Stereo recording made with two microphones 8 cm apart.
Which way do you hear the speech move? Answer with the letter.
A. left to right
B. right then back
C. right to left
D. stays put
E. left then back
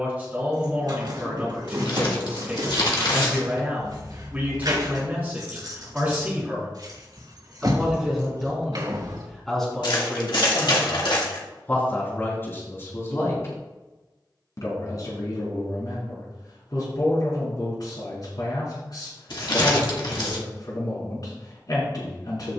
C.